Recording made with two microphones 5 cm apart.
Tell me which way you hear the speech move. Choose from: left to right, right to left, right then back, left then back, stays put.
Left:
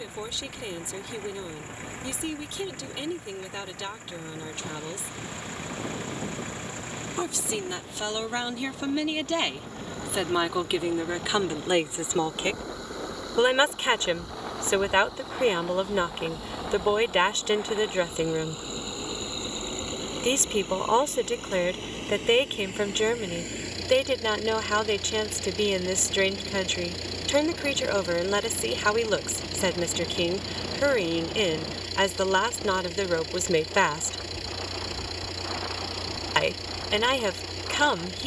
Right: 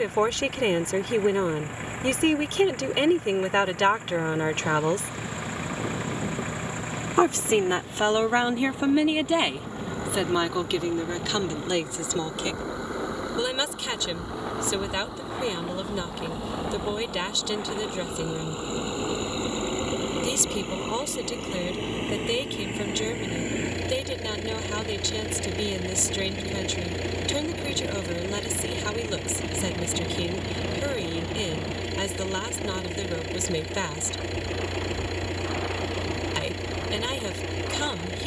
right to left.